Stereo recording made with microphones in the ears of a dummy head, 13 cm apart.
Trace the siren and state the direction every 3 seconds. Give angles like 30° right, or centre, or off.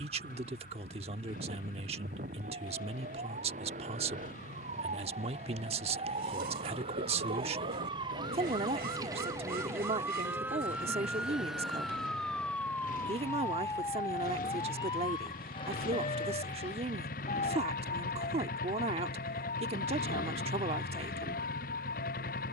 60° right, 50° right, 40° right, 10° right, 20° left, 40° left, 50° left, 60° left.